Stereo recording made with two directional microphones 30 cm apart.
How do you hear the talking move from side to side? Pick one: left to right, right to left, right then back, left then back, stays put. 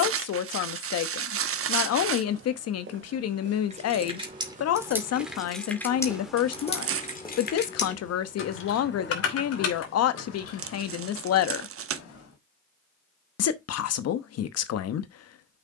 stays put.